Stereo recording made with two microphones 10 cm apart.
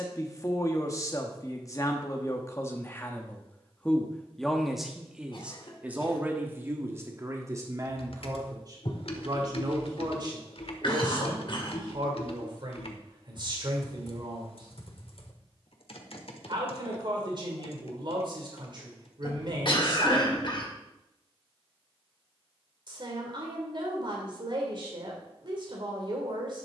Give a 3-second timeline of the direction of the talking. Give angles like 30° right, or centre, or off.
30° left, centre, 30° right, 40° right, 50° right, 50° right, 50° right, 50° right, 50° right.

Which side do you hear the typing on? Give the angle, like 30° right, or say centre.
70° left.